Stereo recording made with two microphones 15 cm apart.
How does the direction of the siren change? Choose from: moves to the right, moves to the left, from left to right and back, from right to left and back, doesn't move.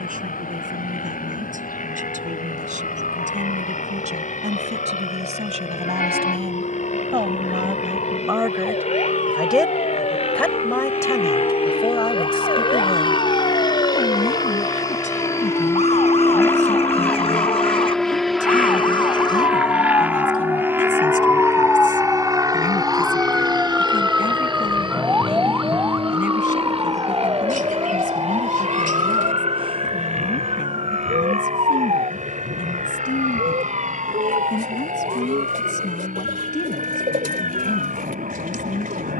moves to the right.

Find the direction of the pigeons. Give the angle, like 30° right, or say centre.
70° right.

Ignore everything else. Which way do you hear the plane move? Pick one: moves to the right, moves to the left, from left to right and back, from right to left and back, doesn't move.
moves to the right.